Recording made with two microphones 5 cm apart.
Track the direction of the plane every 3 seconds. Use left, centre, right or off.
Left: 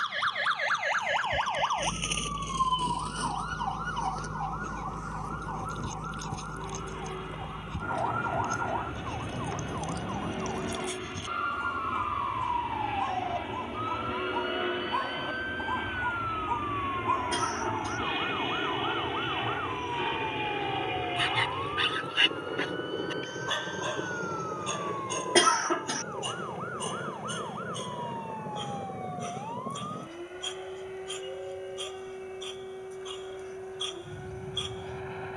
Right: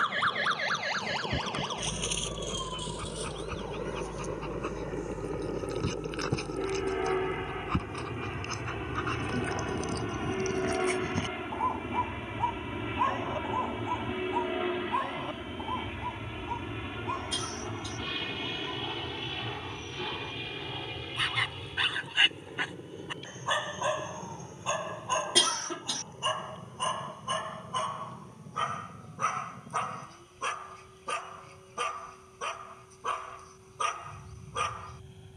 right, right, right, right, centre, centre, left, left, left, left, left, left.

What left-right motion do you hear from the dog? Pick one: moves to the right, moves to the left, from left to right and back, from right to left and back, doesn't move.
from right to left and back.